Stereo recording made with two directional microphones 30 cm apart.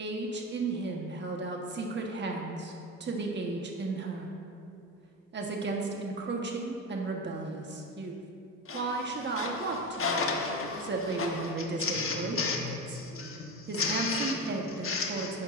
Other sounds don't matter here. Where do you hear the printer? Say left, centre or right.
left.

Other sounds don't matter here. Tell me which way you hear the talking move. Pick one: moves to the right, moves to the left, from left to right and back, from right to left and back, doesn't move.
doesn't move.